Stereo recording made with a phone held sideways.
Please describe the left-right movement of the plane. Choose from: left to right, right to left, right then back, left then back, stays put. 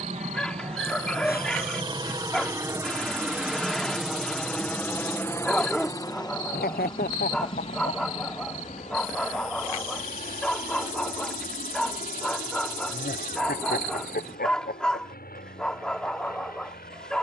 right to left.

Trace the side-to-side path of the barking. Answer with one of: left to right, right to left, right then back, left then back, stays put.
stays put.